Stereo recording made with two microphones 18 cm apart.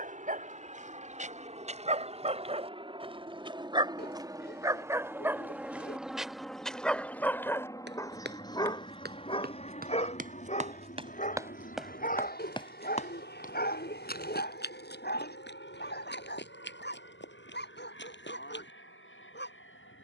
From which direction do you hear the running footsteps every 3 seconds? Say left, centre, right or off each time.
off, off, right, right, left, left, left.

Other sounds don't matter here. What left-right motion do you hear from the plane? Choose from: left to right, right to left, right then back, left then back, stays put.
right to left.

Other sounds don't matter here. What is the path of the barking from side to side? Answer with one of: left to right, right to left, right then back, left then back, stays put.
right to left.